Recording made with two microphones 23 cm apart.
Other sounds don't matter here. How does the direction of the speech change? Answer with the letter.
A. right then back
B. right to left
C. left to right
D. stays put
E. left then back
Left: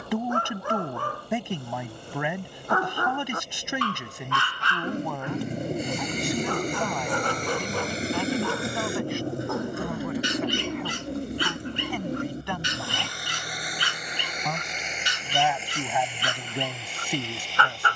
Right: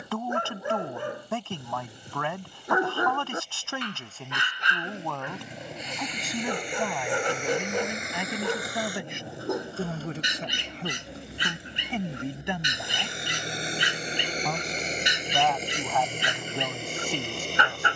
A.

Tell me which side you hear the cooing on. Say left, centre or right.
left.